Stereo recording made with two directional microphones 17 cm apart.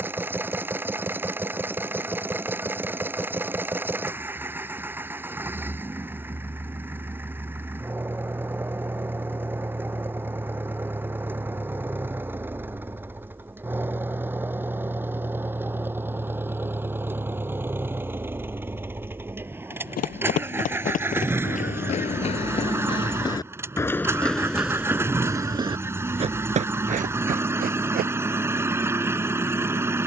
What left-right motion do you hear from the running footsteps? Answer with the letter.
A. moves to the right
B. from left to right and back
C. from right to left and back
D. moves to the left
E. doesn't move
A.